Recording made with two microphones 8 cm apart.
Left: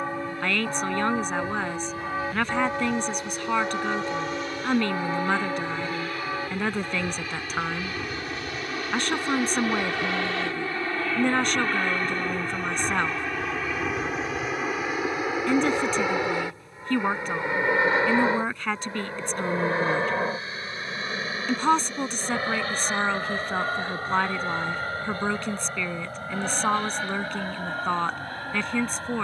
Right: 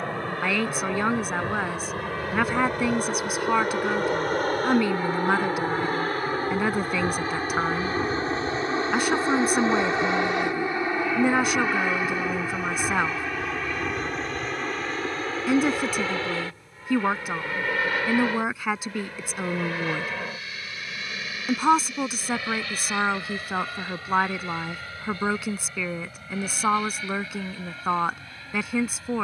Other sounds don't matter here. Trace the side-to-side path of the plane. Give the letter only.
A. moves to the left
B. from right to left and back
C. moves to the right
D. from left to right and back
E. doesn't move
A.